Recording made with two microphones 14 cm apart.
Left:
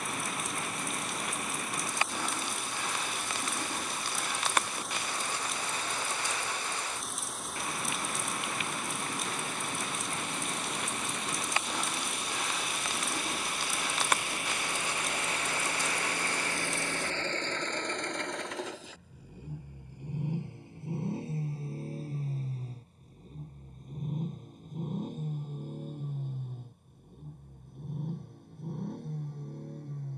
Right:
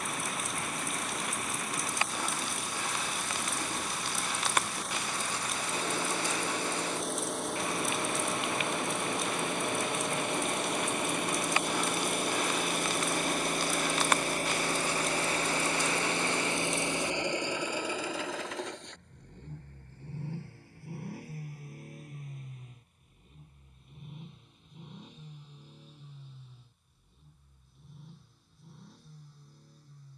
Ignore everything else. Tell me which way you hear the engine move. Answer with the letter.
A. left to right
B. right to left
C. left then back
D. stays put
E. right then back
B.